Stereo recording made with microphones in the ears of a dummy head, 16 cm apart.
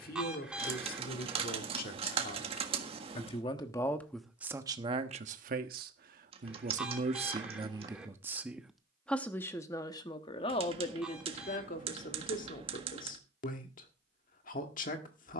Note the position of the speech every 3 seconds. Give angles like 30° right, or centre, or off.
50° left, 10° right, 20° right, 30° left, 50° left.